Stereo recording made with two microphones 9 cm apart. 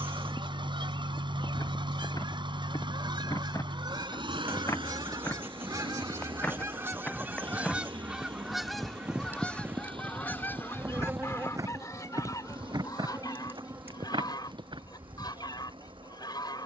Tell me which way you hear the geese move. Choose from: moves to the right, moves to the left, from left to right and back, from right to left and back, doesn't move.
moves to the left.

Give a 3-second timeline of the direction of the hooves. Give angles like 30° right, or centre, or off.
50° left, 30° left, 10° left, 20° right, 50° right, off.